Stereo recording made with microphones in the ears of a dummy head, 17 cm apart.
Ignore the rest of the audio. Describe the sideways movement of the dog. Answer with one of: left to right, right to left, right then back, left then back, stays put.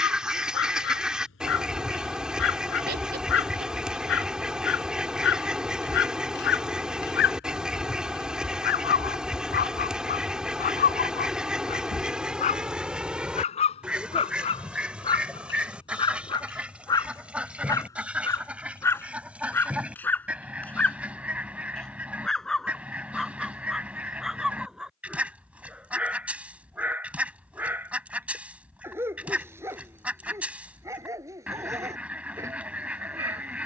left to right.